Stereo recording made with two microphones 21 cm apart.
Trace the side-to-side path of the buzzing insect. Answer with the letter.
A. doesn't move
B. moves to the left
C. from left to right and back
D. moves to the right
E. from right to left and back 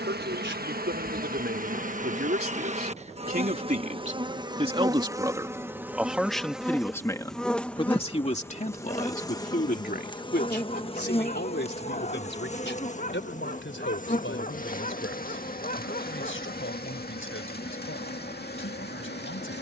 B.